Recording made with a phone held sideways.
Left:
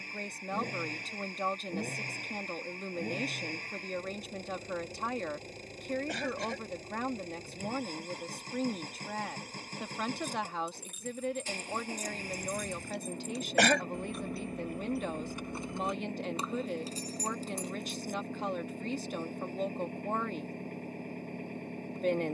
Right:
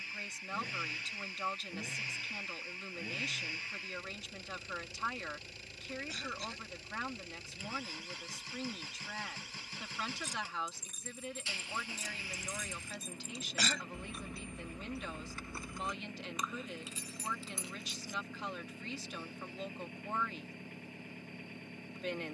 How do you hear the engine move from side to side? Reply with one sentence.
You can hear the engine stay put.